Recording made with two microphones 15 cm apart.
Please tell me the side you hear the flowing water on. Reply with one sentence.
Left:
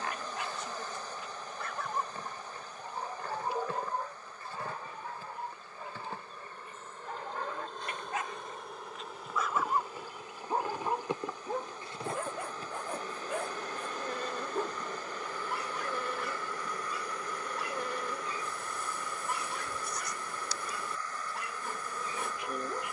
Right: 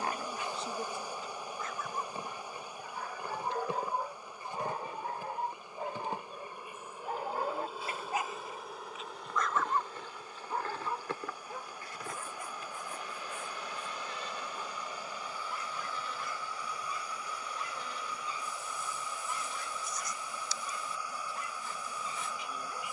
You can hear the flowing water in the centre.